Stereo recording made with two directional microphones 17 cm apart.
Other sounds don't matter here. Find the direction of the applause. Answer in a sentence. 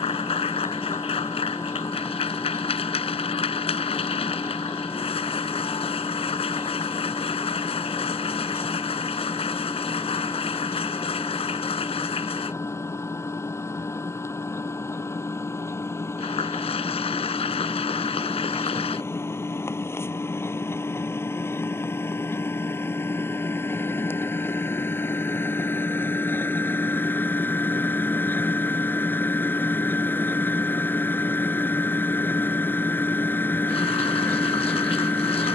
In this clip you hear the applause on the left.